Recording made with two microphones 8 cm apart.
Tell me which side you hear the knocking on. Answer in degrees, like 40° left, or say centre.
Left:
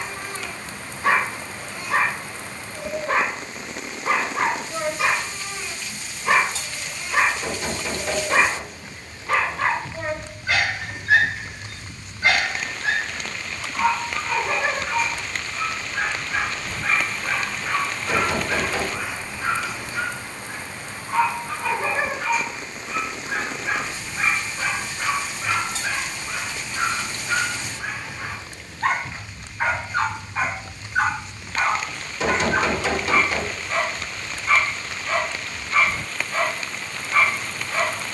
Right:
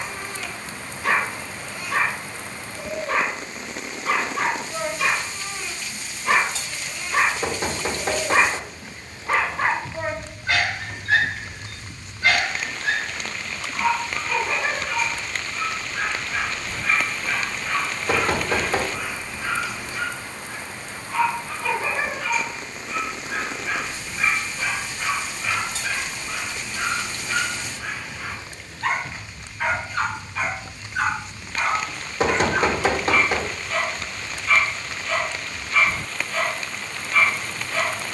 40° right.